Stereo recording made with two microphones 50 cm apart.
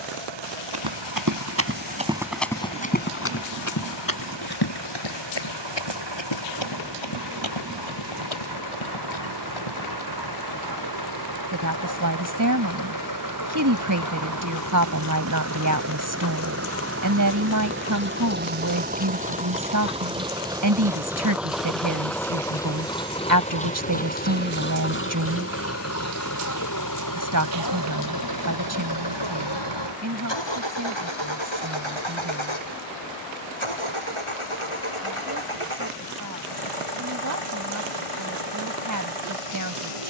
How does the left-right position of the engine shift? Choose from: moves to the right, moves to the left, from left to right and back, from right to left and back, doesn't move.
moves to the left.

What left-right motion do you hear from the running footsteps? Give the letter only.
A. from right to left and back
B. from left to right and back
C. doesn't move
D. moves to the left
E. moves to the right
D.